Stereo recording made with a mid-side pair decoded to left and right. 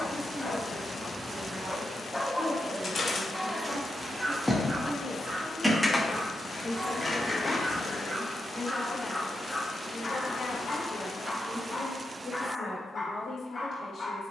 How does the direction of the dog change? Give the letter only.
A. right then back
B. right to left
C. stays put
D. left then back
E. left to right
A.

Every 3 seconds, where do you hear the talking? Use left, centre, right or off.
right, right, left, left, left.